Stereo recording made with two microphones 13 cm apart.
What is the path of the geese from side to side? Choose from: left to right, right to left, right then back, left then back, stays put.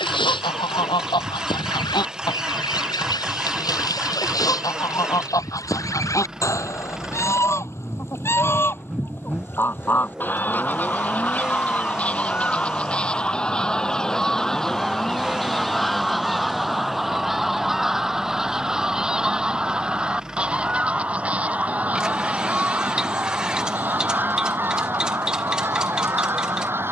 left to right.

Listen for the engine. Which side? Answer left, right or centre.
centre.